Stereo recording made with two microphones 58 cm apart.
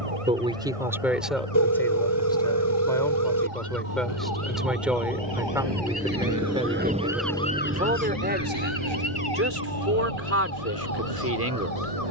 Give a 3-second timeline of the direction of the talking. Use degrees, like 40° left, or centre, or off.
centre, centre, 10° right, 20° right.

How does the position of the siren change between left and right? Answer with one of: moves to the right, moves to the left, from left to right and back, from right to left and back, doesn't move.
moves to the left.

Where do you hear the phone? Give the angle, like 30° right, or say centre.
30° left.